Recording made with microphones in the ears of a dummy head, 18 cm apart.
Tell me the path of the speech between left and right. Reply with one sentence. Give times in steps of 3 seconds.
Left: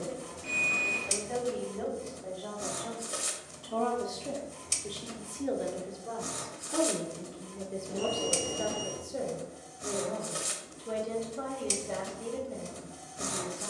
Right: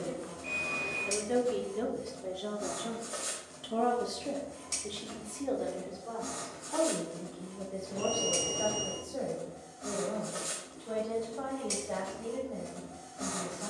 In this clip you hear the speech on the right from 0 s, in the centre from 3 s and on the left from 6 s.